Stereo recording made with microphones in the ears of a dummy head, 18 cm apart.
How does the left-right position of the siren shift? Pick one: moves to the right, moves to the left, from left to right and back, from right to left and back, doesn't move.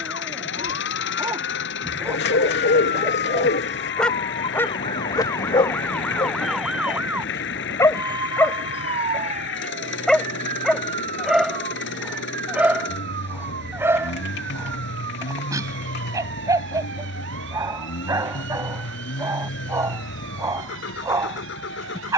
moves to the right.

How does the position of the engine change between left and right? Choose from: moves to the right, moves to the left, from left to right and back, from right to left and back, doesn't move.
doesn't move.